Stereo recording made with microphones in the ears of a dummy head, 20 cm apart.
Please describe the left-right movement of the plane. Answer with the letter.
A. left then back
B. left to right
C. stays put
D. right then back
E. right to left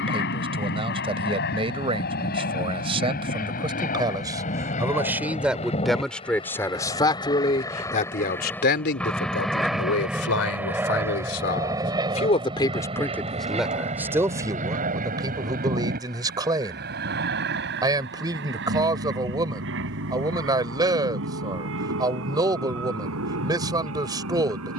B.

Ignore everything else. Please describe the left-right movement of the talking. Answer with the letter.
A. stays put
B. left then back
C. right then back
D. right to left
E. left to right
B.